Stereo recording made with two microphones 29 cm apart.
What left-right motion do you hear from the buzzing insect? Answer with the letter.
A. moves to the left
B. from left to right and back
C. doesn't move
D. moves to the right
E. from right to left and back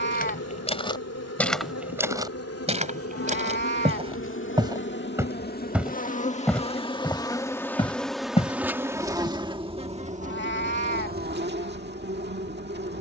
D.